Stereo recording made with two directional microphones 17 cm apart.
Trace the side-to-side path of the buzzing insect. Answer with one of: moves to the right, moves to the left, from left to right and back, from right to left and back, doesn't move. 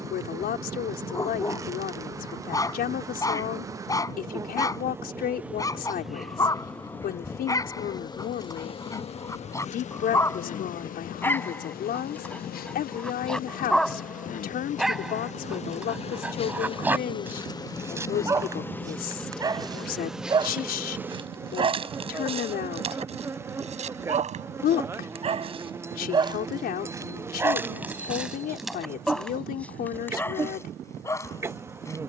from right to left and back.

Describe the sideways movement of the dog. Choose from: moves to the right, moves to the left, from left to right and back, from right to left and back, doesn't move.
from left to right and back.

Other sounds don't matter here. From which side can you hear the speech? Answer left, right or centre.
left.